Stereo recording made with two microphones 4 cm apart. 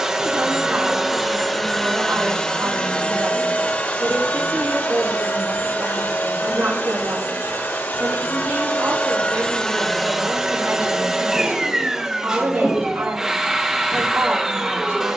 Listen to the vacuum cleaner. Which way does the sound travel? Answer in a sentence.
In this clip you hear the vacuum cleaner move from right to left and back again.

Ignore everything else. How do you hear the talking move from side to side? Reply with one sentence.
In this clip you hear the talking stay put.